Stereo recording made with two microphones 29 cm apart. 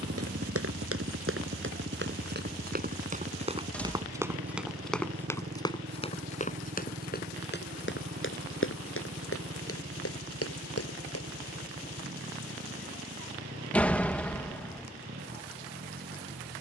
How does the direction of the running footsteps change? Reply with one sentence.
You can hear the running footsteps move from right to left.